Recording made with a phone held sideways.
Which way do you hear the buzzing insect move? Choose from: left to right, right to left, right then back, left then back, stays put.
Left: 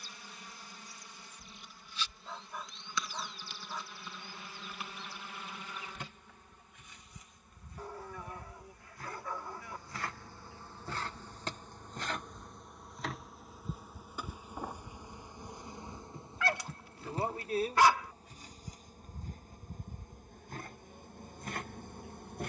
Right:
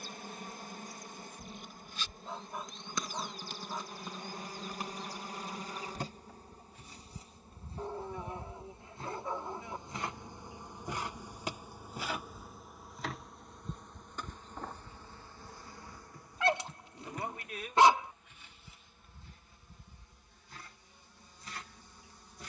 right to left.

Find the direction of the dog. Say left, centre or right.
right.